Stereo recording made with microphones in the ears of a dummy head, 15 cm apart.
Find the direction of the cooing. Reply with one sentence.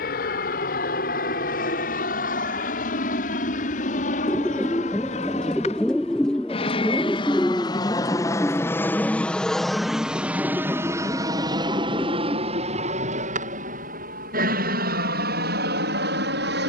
In this clip you hear the cooing in the centre.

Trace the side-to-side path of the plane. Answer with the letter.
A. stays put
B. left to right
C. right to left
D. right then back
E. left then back
B.